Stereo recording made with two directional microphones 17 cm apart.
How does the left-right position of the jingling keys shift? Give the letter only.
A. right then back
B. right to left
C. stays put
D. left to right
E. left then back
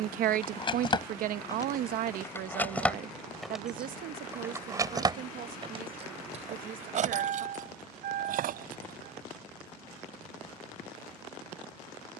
D.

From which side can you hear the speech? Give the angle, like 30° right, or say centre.
60° right.